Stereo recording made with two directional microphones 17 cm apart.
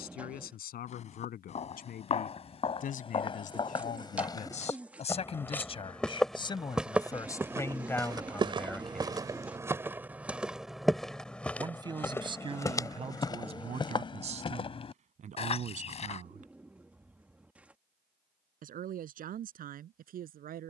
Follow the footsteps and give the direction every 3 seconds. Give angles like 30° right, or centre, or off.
40° left, 20° left, 10° right, 10° right, 20° left, 40° left, off.